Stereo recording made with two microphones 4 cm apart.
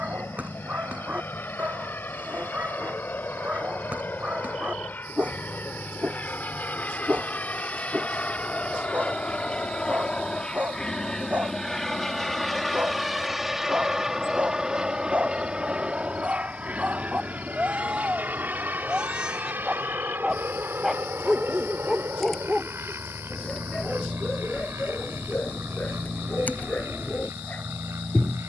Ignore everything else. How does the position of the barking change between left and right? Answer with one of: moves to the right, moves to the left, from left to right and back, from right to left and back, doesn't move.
moves to the left.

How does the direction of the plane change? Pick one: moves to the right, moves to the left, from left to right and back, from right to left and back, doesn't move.
moves to the right.